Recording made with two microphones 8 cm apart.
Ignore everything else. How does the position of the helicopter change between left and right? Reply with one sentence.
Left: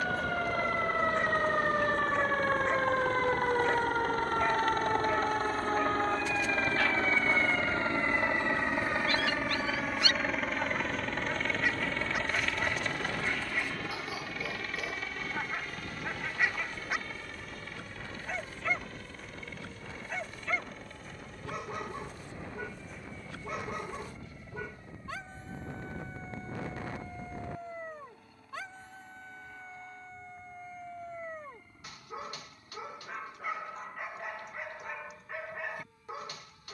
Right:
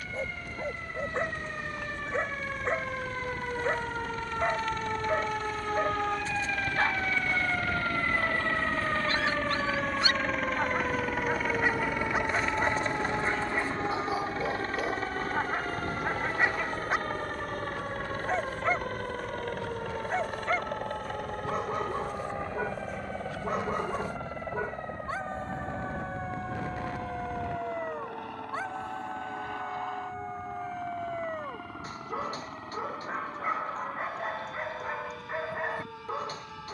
You can hear the helicopter move from left to right.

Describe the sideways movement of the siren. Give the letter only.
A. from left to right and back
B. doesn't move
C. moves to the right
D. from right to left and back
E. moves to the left
C.